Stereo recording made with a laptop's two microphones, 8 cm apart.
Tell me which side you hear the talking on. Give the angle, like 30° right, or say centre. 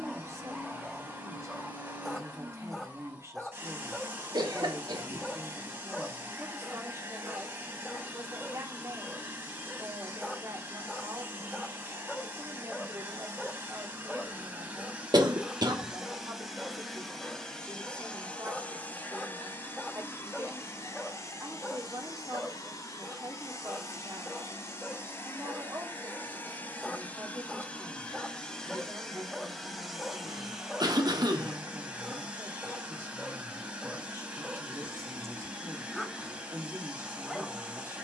40° right.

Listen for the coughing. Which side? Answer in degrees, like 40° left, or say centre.
60° right.